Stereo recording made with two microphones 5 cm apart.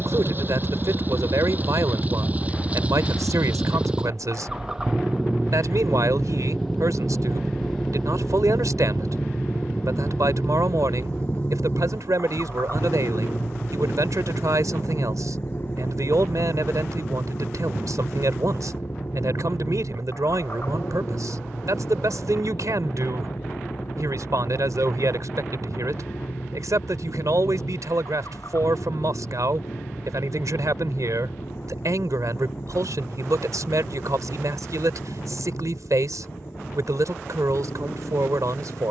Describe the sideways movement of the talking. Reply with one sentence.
You can hear the talking stay in one place.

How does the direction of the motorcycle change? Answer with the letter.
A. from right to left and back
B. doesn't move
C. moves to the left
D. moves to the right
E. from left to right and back
C.